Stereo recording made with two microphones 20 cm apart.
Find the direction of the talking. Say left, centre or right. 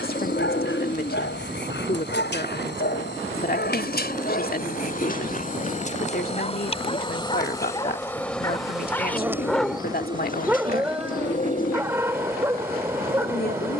left.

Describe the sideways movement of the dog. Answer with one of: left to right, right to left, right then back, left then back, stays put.
left to right.